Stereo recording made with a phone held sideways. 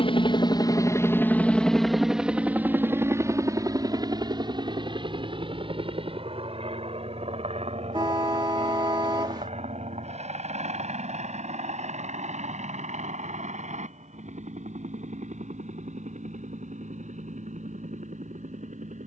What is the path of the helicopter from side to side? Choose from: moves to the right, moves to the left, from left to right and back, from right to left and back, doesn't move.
moves to the right.